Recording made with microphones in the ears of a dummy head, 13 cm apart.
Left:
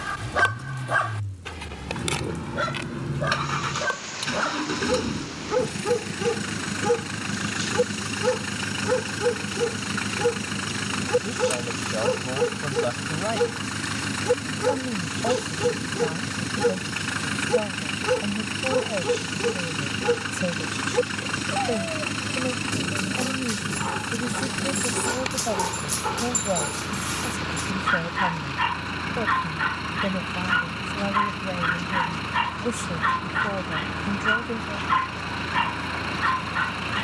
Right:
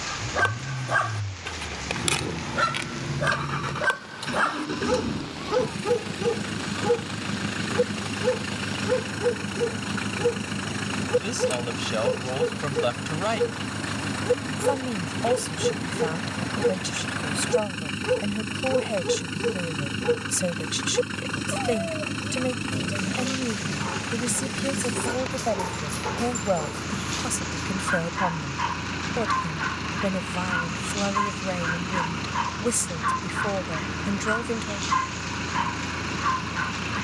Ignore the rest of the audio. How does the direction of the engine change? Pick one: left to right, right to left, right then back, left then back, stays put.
stays put.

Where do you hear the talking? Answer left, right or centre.
right.